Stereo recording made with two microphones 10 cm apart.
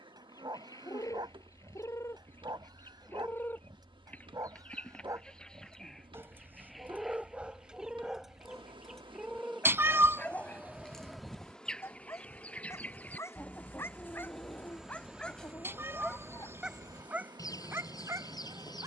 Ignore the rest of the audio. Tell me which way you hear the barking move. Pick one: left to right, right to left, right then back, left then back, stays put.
left then back.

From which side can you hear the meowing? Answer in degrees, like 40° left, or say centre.
20° right.